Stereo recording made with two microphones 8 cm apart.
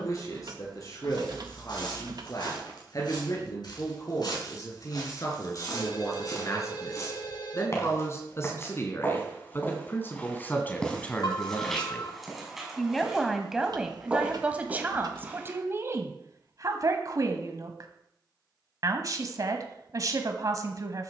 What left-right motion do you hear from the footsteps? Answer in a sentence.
You can hear the footsteps move from left to right.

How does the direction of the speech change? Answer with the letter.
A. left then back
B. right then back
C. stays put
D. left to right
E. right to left
D.